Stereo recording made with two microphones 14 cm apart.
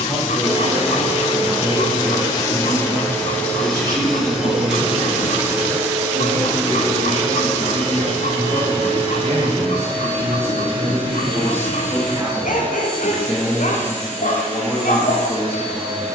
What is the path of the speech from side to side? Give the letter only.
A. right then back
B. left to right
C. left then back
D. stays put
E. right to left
A.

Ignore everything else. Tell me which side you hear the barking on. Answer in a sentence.
You can hear the barking on the left.